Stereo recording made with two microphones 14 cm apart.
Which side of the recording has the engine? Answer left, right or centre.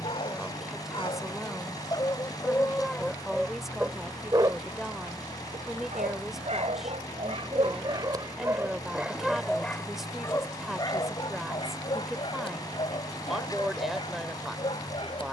left.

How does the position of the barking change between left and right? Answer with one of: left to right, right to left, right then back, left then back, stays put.
right then back.